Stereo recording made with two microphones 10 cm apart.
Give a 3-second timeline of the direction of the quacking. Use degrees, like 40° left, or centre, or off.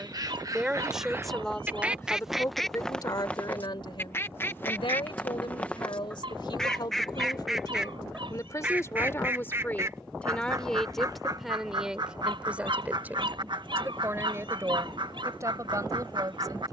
20° right, 20° left, centre, 40° right, 50° right, 60° right.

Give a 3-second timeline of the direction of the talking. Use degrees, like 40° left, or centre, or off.
10° left, 60° left, 50° left, 10° left, 20° right, 40° right.